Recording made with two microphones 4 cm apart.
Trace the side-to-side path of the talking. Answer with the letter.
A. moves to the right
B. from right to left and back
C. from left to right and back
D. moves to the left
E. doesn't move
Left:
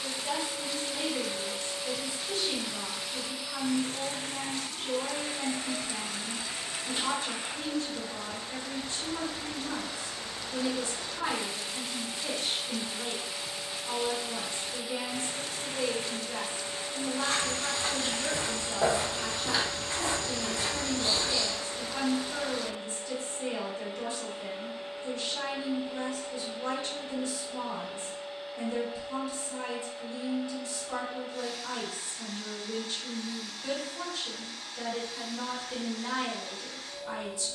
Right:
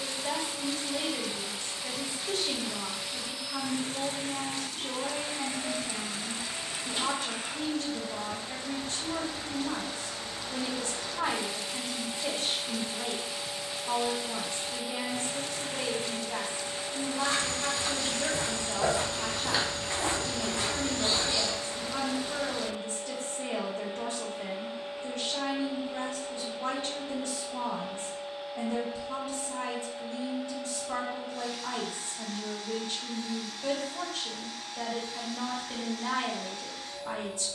E.